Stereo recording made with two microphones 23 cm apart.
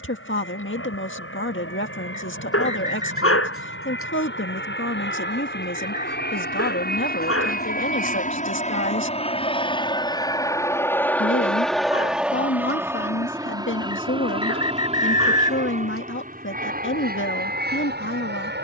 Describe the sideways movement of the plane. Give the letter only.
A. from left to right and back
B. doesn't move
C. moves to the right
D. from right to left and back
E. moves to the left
C.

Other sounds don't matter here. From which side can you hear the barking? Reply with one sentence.
In this clip you hear the barking on the left.